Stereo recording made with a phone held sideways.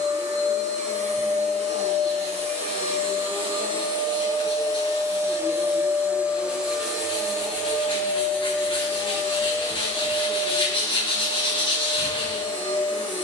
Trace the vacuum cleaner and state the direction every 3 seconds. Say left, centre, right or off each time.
right, right, centre, left, left.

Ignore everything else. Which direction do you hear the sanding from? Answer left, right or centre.
left.